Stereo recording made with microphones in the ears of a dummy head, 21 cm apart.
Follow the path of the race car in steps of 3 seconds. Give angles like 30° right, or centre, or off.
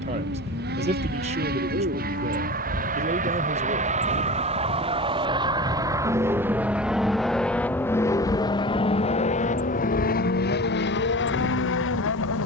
50° right, 30° right, centre, 40° left.